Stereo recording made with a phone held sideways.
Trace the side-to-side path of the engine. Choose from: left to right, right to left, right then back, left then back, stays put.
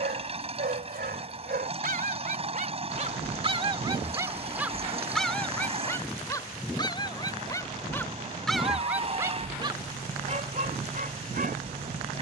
stays put.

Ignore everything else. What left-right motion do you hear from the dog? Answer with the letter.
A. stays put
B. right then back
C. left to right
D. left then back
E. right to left
D.